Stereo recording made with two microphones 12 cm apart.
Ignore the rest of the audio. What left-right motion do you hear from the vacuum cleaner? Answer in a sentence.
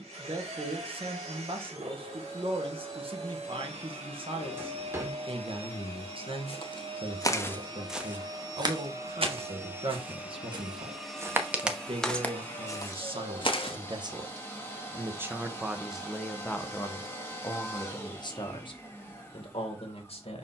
You can hear the vacuum cleaner move to the left.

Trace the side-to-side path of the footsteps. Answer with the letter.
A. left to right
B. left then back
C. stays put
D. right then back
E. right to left
D.